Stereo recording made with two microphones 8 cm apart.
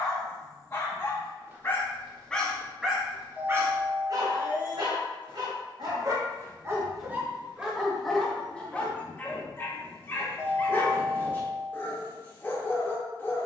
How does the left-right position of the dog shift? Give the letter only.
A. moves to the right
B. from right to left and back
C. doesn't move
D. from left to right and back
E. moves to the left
D.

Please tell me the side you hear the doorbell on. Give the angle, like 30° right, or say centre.
20° left.